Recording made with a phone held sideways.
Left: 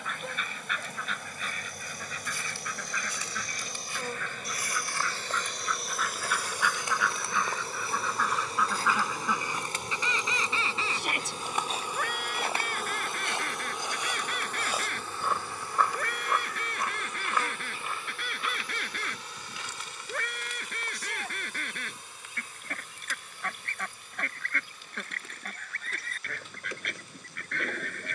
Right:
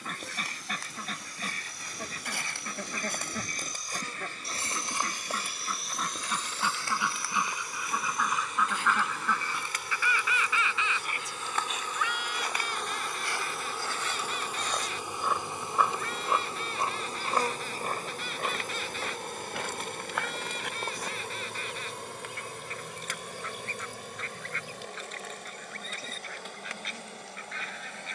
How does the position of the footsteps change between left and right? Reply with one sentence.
In this clip you hear the footsteps move from right to left and back again.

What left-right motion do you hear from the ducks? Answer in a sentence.
You can hear the ducks go from the right side to the left.